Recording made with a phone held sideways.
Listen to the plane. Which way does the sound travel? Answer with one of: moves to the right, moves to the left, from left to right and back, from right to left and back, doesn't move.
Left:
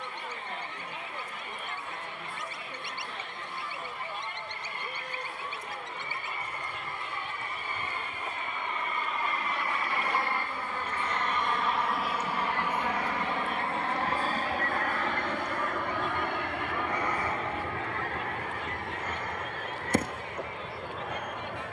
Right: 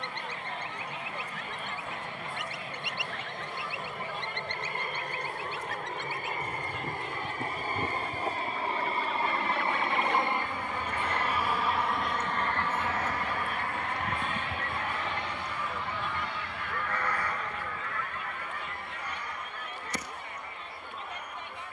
moves to the left.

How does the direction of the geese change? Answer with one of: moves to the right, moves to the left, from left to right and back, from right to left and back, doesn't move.
moves to the left.